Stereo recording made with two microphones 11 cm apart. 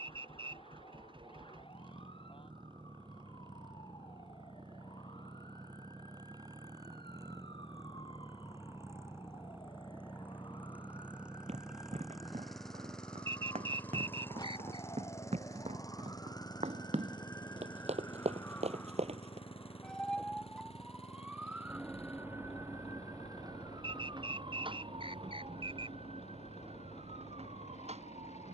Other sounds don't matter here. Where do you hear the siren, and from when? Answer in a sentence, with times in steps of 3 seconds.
In this clip you hear the siren on the left from 0 s, in the centre from 18 s and on the right from 21 s.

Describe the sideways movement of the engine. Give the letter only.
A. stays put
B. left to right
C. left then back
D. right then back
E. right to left
E.